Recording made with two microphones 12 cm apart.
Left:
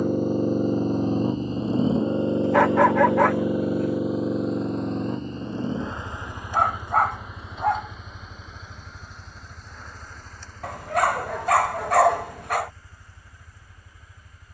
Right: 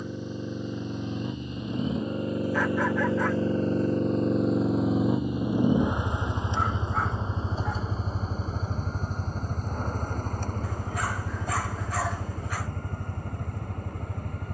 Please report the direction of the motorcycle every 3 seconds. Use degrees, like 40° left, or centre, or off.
40° left, centre, 30° right, 50° right, 50° right.